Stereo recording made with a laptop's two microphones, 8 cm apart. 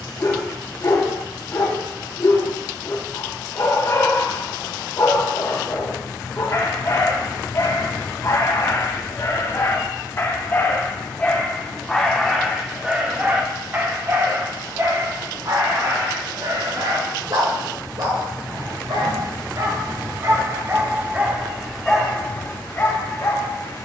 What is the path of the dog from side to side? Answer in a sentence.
You can hear the dog go right and come back.